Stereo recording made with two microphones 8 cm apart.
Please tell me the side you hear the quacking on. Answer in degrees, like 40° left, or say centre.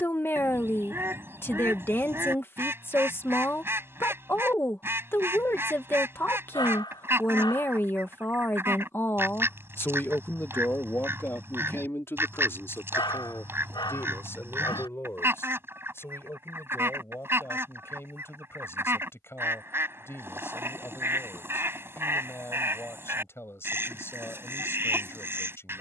30° right.